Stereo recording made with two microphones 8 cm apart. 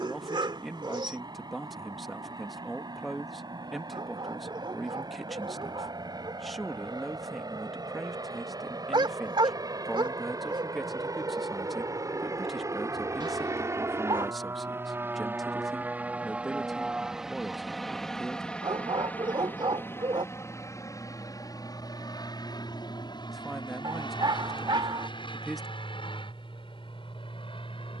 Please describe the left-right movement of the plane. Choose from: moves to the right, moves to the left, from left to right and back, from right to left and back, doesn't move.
moves to the left.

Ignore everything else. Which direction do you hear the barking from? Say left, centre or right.
right.